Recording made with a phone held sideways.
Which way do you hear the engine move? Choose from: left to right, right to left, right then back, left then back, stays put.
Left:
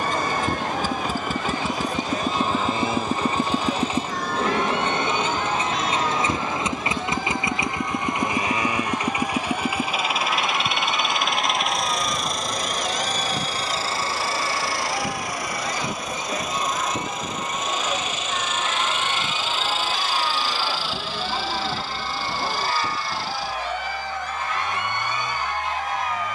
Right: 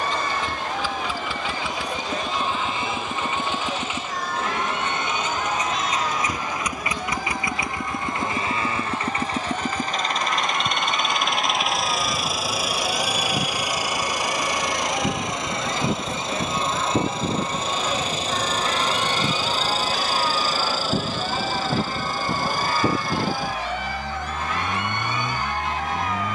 left to right.